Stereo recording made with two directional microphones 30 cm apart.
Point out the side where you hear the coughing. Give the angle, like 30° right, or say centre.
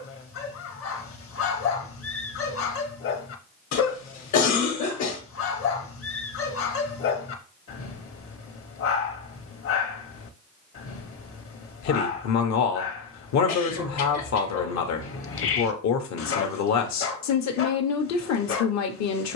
60° left.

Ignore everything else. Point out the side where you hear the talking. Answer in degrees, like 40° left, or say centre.
60° left.